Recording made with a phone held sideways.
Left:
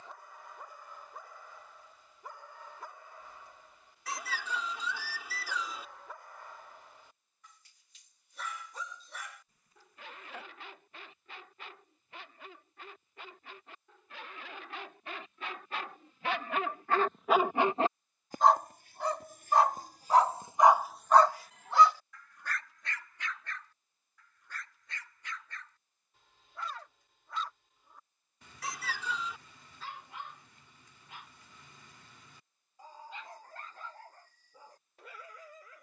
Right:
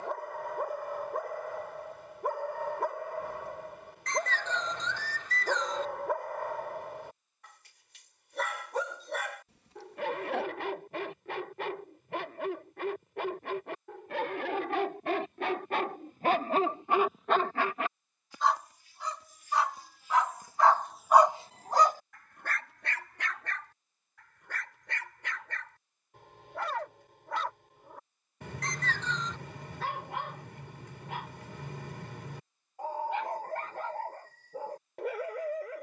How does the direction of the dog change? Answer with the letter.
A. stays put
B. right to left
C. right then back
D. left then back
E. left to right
D.